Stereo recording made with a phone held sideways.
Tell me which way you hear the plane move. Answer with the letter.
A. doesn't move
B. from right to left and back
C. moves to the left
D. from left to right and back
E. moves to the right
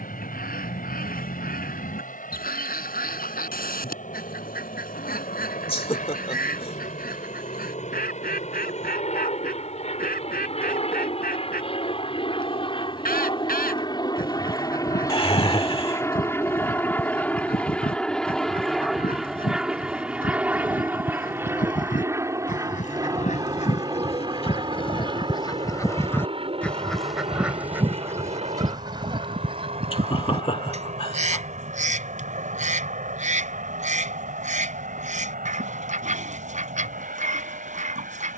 E.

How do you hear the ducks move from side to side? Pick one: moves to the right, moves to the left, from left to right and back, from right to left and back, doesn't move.
moves to the right.